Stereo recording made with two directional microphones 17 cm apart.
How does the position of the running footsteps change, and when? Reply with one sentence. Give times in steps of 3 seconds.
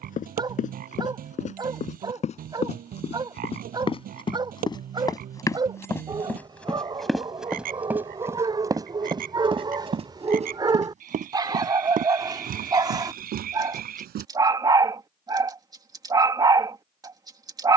In this clip you hear the running footsteps on the left from 0 s, in the centre from 6 s, on the right from 9 s and not at all from 15 s.